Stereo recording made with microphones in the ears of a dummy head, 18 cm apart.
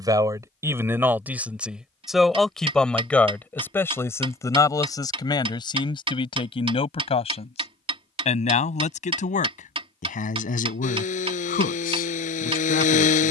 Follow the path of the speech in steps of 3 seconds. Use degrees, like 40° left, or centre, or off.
10° right, 20° left, 30° left, 40° left, 50° left.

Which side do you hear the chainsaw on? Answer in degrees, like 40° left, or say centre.
40° left.